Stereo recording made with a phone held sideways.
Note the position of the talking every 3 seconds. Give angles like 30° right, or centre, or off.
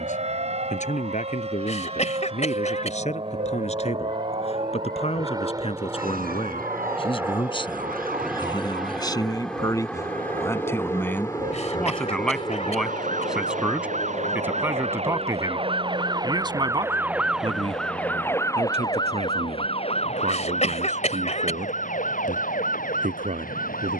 50° left, 50° left, 30° left, 20° left, 10° right, 30° right, 50° right, 60° right.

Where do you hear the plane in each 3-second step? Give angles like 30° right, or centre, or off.
50° right, 30° right, 10° right, 10° left, 30° left, 50° left, 60° left, 70° left.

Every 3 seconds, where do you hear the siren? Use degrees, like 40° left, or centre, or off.
80° right, 80° right, 80° right, 70° right, 60° right, 20° right, 30° left, 60° left.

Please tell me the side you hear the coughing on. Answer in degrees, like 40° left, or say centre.
50° left.